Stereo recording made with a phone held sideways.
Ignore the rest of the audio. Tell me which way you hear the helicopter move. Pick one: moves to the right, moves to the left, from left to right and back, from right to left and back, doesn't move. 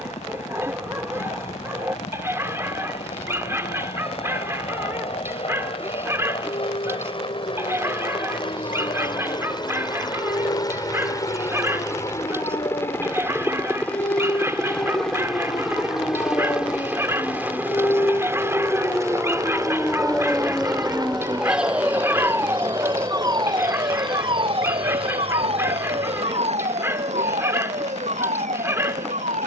moves to the right.